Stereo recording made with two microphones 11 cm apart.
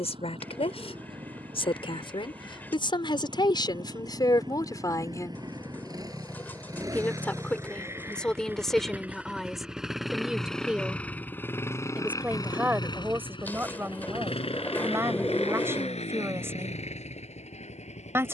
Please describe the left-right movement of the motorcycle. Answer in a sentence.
In this clip you hear the motorcycle go from the right side to the left.